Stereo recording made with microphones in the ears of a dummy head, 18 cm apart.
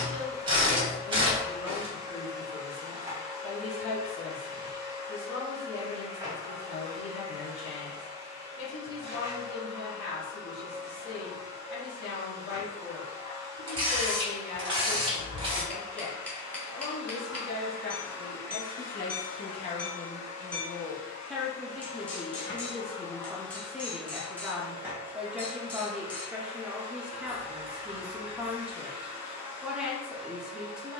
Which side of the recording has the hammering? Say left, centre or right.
centre.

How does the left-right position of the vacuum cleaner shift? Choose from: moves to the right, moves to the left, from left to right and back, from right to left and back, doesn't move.
from right to left and back.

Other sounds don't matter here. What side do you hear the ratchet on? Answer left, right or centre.
right.